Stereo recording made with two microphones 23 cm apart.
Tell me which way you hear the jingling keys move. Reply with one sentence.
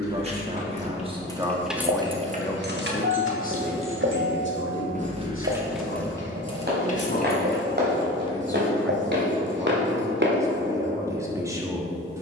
In this clip you hear the jingling keys go right and come back.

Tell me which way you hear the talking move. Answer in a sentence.
In this clip you hear the talking move from right to left and back again.